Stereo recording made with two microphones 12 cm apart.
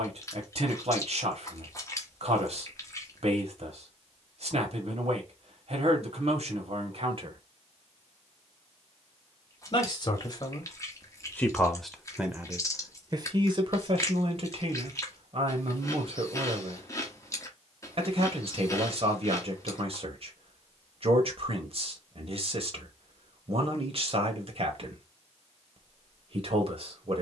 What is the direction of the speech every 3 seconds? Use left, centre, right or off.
right, right, right, left, right, right, right, right, right.